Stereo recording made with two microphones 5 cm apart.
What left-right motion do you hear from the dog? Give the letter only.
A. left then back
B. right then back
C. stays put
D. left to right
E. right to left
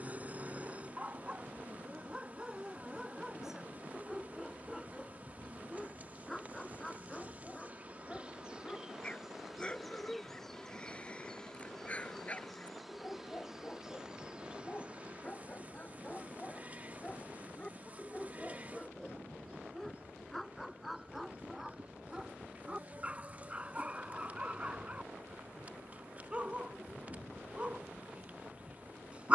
A.